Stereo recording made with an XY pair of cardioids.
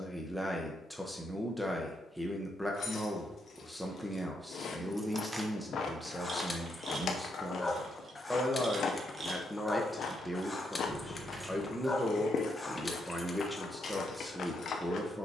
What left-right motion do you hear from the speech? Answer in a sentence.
In this clip you hear the speech stay put.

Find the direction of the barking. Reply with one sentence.
You can hear the barking on the left.